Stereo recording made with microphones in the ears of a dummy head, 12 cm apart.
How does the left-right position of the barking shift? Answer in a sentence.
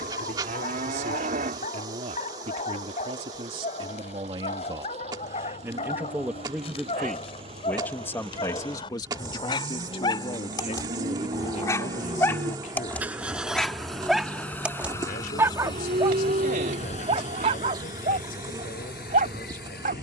You can hear the barking travel towards the right.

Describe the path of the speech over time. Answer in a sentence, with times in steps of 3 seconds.
In this clip you hear the speech on the right from 0 s, in the centre from 6 s and on the left from 9 s.